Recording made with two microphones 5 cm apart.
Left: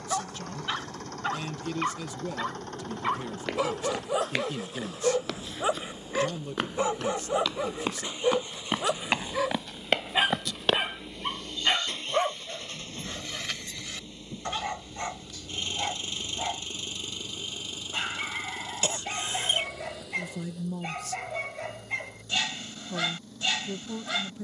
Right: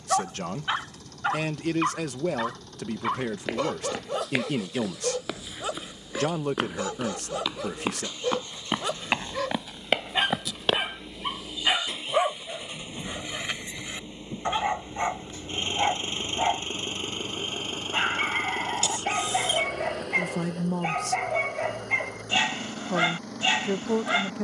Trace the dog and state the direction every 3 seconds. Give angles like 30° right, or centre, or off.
10° right, 10° left, 20° left, centre, 20° right, 30° right, 30° right, 30° right.